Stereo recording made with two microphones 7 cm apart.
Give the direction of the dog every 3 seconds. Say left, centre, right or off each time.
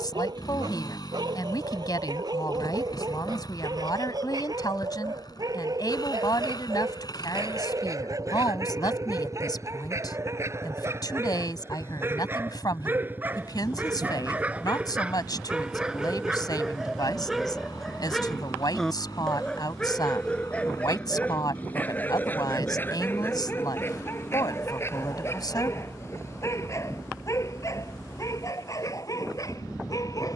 right, right, right, right, right, centre, centre, left, left, left.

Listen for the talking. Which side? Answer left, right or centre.
left.